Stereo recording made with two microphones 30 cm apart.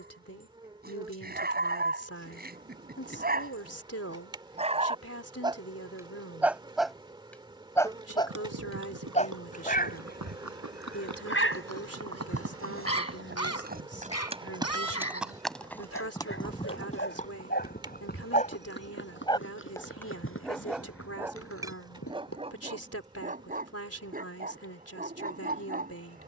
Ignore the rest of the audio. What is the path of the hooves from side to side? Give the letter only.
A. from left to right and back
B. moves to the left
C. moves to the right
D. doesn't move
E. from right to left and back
B.